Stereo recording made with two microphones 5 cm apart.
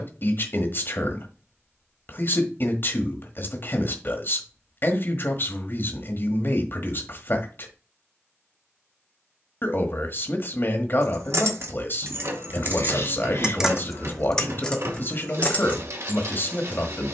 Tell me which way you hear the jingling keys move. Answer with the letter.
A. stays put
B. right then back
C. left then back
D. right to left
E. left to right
D.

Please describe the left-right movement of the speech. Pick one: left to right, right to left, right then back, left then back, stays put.
stays put.